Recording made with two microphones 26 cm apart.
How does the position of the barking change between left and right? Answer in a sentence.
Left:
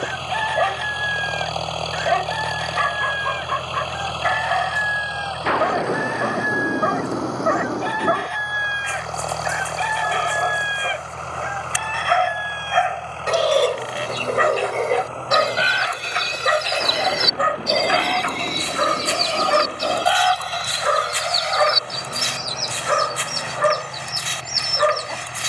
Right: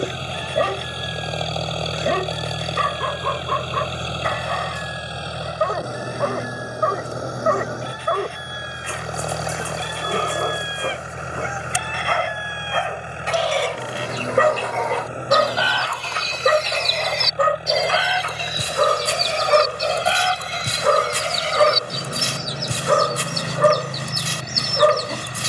You can hear the barking stay in one place.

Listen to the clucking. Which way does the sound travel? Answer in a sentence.
You can hear the clucking move to the right.